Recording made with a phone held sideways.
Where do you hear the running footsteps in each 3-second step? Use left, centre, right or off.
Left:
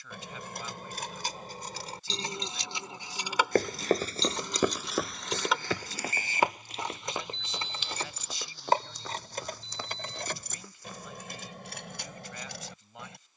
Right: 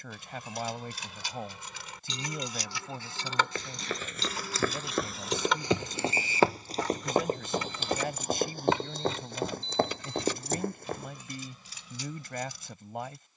off, centre, right, right, off.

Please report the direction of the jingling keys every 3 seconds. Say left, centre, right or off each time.
left, centre, left, left, left.